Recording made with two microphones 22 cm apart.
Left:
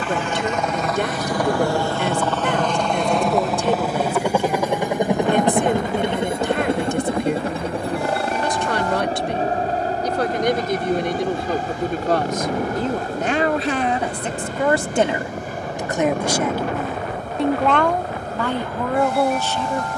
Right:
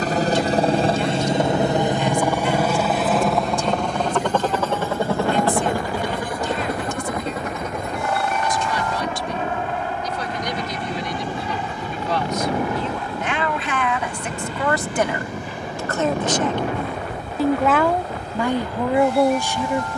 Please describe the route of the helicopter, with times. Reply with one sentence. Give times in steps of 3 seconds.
You can hear the helicopter on the right from 0 s, in the centre from 3 s and on the left from 6 s.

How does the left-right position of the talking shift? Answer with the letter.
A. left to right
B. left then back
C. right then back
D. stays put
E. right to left
A.